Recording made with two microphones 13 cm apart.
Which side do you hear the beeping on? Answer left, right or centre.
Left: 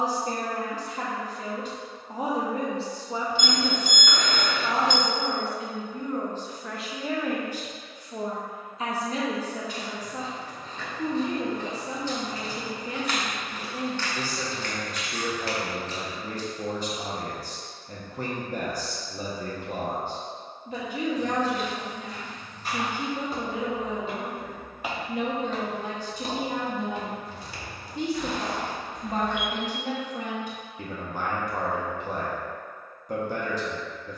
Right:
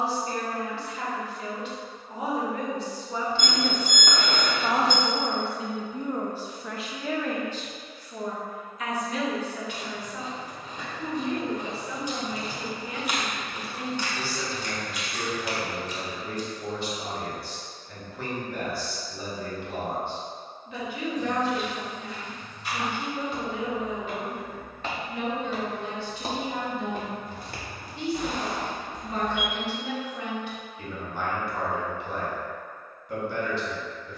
right.